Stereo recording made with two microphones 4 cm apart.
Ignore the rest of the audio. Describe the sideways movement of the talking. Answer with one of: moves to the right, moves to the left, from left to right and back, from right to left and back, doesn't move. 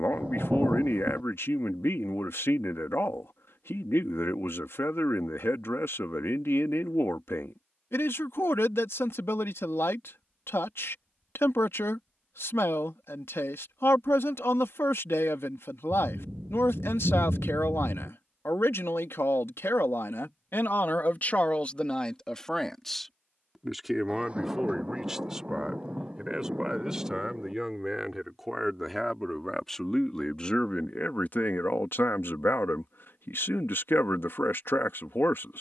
from left to right and back.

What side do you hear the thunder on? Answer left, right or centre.
right.